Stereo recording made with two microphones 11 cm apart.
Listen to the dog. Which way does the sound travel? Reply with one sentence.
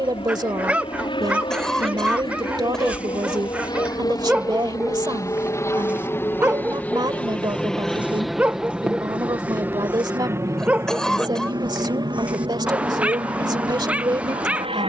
You can hear the dog stay put.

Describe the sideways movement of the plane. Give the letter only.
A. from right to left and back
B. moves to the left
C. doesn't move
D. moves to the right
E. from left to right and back
D.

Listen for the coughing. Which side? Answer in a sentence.
You can hear the coughing in the centre.